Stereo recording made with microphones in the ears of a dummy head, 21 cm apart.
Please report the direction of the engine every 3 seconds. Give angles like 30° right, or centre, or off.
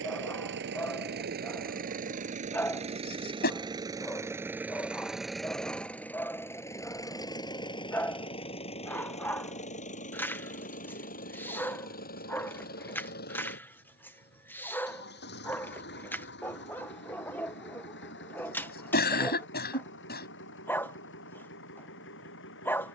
40° right, 10° right, 20° left, 40° left, 50° left, 50° left, 50° left, 60° left.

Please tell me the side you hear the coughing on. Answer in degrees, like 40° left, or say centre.
50° left.